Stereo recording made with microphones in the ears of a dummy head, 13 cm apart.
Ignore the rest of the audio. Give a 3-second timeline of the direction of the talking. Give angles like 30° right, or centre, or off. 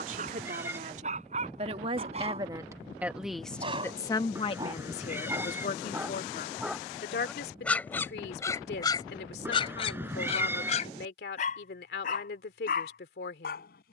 40° right, 30° left, 70° left, 70° left, 70° left.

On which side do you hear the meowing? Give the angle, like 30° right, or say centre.
10° right.